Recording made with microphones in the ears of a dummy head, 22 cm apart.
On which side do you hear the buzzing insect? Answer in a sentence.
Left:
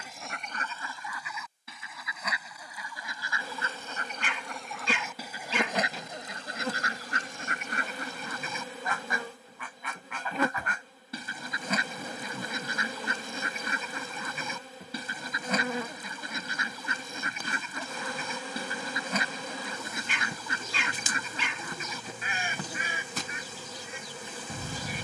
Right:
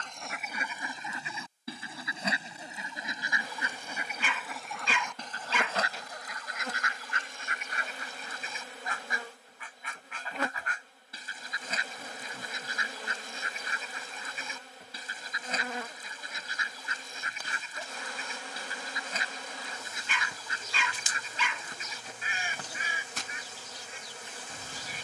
In this clip you hear the buzzing insect on the left.